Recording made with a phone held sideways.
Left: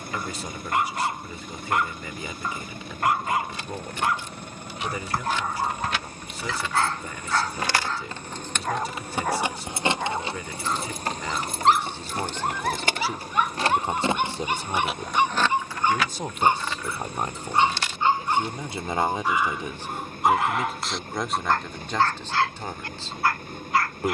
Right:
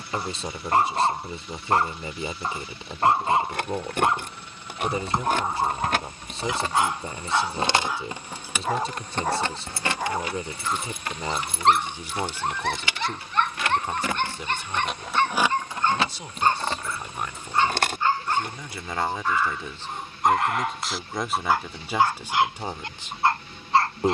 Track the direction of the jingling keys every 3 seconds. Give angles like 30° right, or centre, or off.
off, 60° right, 30° right, 30° left, 40° left, 40° right, 60° right, off.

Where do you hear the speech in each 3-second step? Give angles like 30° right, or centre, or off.
30° right, 30° right, 30° right, 30° right, 20° left, 40° left, 20° left, 10° right.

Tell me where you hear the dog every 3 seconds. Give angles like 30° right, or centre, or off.
30° right, 20° right, 10° right, centre, 10° left, 20° left, 10° left, 20° right.